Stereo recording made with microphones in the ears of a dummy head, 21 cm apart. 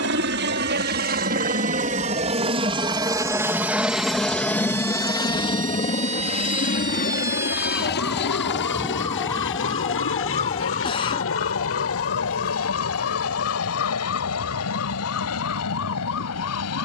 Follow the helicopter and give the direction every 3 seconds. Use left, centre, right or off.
right, centre, left, left, left, left.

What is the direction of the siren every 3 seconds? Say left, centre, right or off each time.
right, right, centre, left, left, left.